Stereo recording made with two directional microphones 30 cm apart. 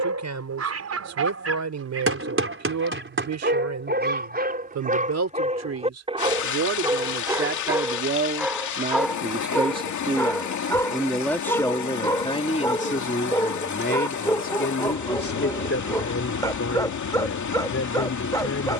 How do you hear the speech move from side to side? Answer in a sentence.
In this clip you hear the speech move to the left.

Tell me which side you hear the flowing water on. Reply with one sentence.
In this clip you hear the flowing water on the left.